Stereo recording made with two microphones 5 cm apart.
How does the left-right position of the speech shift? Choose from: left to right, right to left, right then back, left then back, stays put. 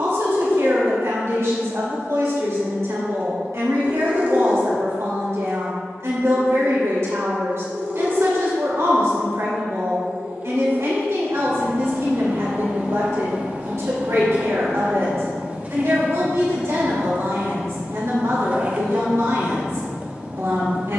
stays put.